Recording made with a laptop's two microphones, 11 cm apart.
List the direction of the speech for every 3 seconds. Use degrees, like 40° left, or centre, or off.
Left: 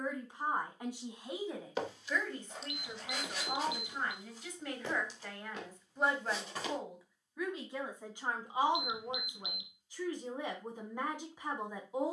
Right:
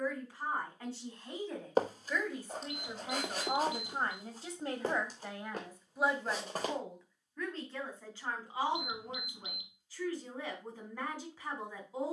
10° left, 30° right, 10° left, 20° left.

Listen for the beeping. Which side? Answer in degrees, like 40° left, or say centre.
40° right.